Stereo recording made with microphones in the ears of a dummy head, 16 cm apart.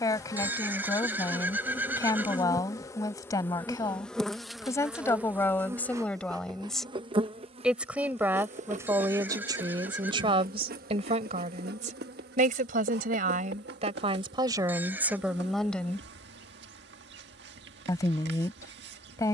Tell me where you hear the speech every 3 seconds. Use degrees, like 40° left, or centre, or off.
20° left, 20° left, centre, 30° right, 40° right, centre, 20° left.